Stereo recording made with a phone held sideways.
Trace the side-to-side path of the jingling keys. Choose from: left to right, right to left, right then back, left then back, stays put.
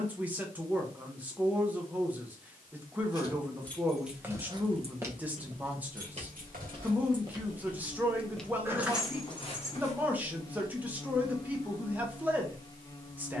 right then back.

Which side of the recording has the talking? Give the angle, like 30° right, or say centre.
10° right.